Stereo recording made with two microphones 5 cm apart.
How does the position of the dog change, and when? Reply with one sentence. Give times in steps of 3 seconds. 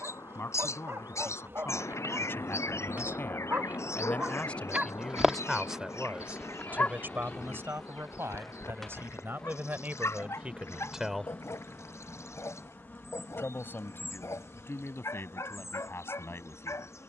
You can hear the dog on the right from 0 s and on the left from 6 s.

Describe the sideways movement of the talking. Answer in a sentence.
In this clip you hear the talking go right and come back.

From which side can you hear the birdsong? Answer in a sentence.
You can hear the birdsong on the left.